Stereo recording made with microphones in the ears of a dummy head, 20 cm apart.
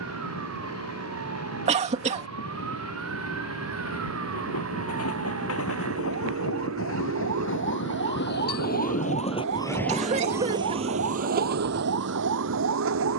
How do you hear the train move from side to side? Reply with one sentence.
In this clip you hear the train move to the right.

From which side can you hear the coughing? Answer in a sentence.
In this clip you hear the coughing on the right.